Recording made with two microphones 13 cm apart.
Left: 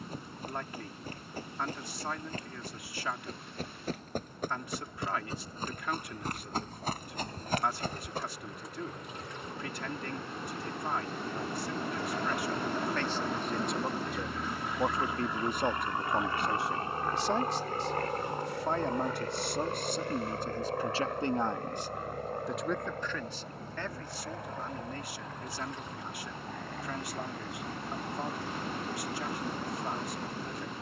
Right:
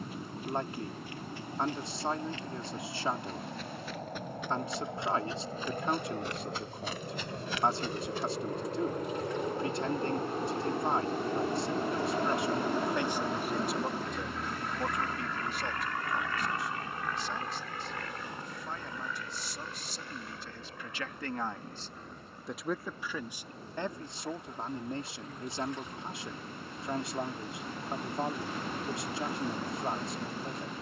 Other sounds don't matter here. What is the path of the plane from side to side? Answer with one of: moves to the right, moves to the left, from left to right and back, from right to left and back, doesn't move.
moves to the left.